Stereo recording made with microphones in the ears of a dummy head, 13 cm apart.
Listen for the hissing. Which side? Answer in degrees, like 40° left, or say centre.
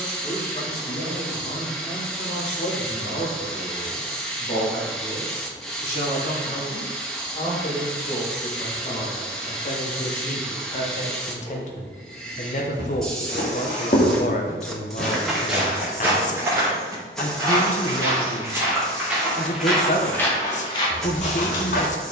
centre.